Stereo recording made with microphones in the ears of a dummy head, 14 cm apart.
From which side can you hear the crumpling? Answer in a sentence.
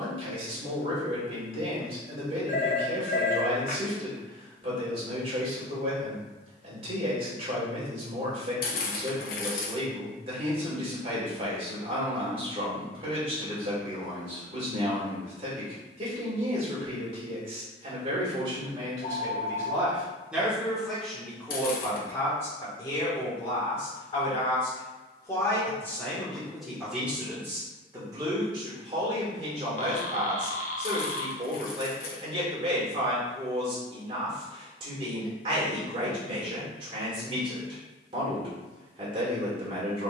In this clip you hear the crumpling on the left.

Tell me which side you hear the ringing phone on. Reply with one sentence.
You can hear the ringing phone on the left.